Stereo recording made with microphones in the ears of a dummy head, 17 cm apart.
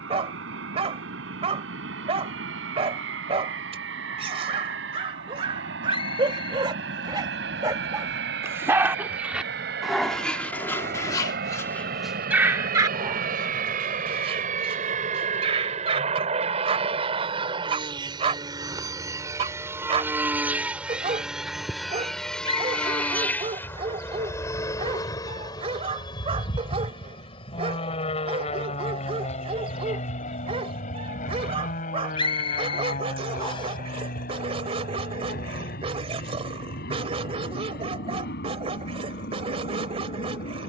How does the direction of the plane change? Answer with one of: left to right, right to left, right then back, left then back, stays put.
right to left.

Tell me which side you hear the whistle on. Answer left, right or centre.
left.